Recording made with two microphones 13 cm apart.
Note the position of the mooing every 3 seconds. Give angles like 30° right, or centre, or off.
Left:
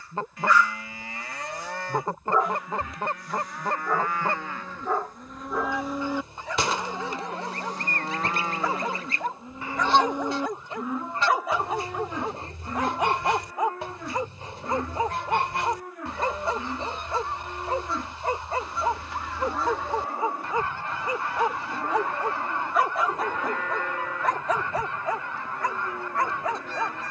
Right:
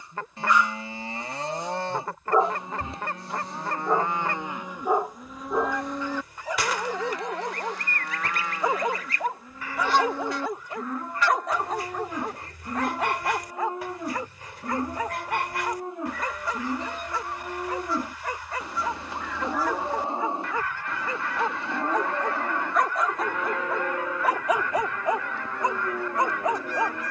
30° right, 10° right, 30° left, 10° left, 20° right, 20° right, 20° right, 20° right, 20° right.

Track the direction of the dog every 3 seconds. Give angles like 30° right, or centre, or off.
20° right, 20° right, 20° right, centre, 20° left, 30° left, 30° left, 10° left, 20° right.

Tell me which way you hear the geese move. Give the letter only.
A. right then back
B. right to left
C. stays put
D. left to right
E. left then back
C.